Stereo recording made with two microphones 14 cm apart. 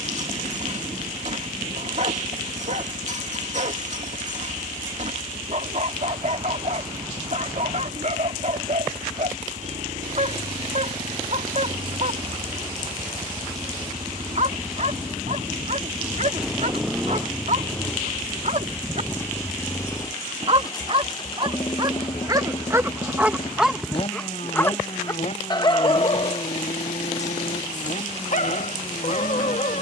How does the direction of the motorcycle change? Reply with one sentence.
You can hear the motorcycle move from right to left.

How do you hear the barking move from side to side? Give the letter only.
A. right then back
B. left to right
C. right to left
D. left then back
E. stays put
C.